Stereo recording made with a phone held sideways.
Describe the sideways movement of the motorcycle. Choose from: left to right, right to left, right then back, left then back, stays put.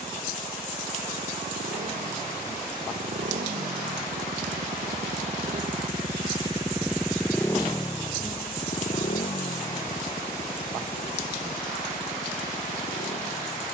right to left.